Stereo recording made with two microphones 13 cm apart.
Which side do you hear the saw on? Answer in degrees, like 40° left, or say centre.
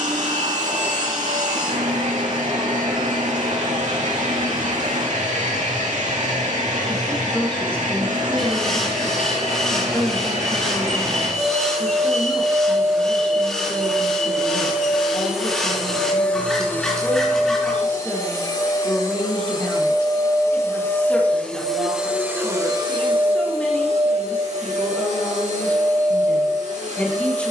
centre.